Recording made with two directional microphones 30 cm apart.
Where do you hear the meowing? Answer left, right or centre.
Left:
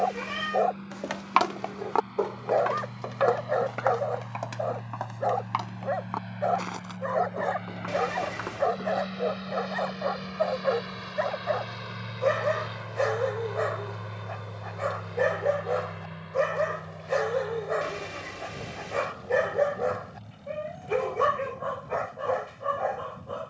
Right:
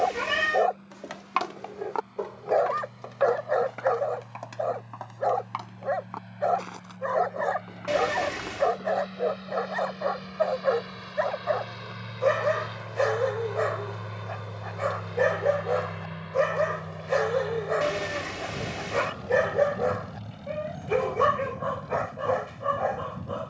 right.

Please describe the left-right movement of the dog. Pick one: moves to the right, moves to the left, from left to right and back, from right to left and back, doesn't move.
doesn't move.